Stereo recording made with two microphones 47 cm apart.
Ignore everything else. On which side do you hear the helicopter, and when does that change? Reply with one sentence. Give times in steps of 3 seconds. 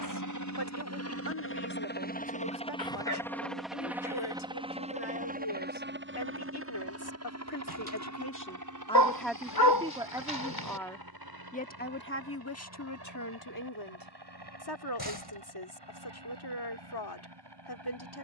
In this clip you hear the helicopter on the left from 0 s, in the centre from 3 s and on the right from 6 s.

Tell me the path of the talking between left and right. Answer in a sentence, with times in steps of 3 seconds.
In this clip you hear the talking on the left from 0 s, in the centre from 9 s and on the left from 12 s.